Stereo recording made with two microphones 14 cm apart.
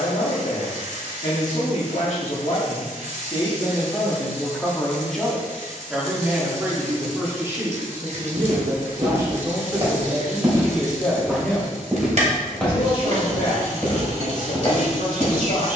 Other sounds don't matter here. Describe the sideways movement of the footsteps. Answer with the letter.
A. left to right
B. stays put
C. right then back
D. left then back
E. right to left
E.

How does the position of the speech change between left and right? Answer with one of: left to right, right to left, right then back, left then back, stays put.
right then back.